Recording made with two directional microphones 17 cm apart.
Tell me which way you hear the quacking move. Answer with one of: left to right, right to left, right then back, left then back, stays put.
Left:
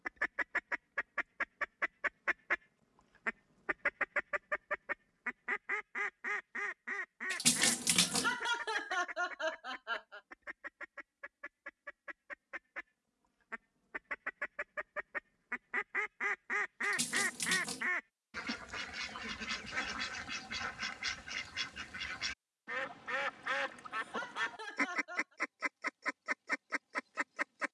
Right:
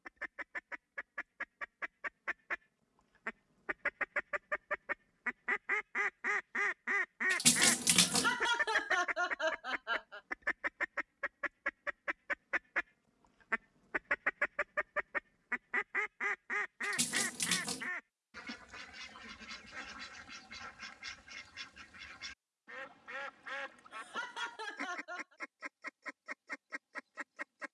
right then back.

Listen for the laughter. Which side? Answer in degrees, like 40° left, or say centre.
10° right.